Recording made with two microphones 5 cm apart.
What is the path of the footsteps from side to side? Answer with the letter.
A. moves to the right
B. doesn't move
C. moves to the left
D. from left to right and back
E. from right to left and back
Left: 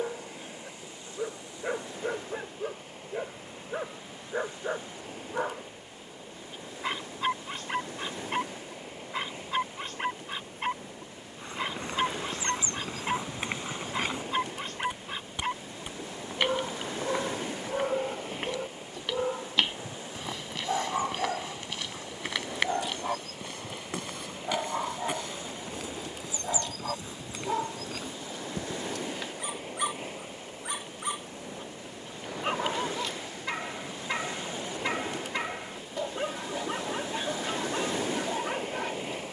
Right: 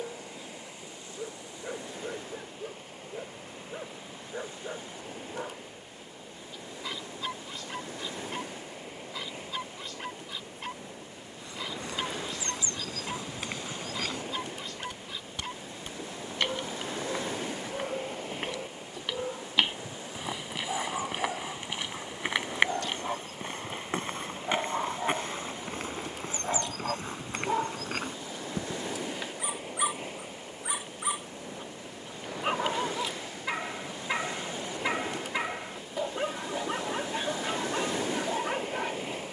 A.